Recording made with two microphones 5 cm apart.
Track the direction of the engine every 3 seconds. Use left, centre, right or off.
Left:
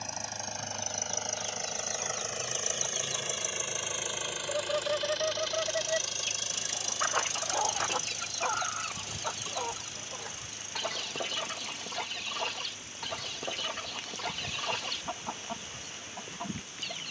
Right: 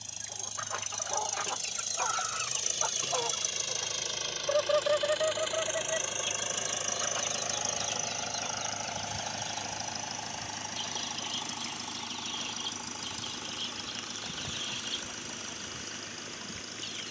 left, centre, right, right, right, right.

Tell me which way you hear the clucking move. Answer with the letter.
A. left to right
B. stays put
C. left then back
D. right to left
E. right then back
D.